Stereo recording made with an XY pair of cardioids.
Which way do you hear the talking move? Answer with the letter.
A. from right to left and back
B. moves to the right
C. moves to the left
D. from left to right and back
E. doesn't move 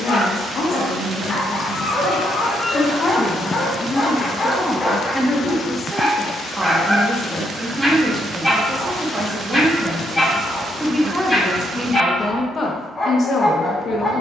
D.